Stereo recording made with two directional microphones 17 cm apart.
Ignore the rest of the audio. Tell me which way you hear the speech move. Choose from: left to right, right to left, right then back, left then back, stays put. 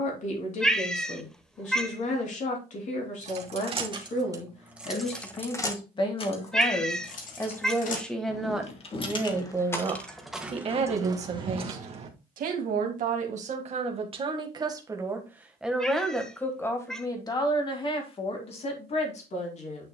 right then back.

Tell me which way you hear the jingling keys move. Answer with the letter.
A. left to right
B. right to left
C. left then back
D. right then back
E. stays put
C.